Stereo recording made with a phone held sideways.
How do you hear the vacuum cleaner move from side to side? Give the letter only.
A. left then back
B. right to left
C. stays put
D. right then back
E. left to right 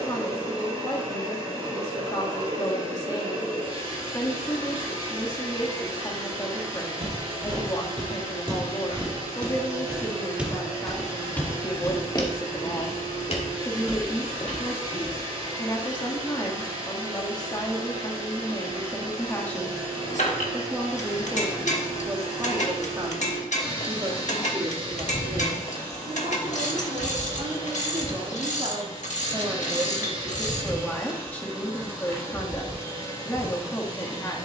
C.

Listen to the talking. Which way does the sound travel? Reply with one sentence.
In this clip you hear the talking go right and come back.